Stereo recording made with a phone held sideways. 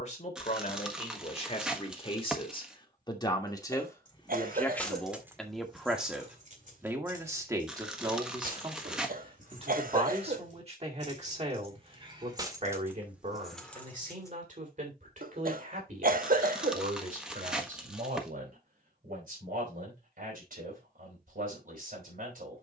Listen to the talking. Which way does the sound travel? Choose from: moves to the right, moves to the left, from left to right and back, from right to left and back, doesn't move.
moves to the right.